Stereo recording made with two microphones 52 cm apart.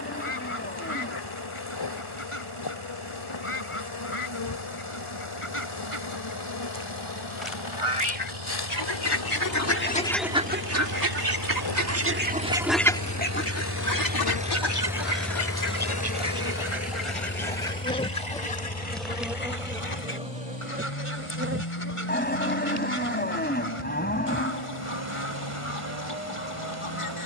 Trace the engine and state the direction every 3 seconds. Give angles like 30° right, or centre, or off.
80° right, 80° right, 70° right, 60° right, 30° right, 20° left, 50° left, 60° left, 70° left.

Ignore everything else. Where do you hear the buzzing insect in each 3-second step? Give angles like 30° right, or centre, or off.
50° left, 50° left, 50° left, 50° left, 50° left, 30° left, centre, 30° right, 30° right.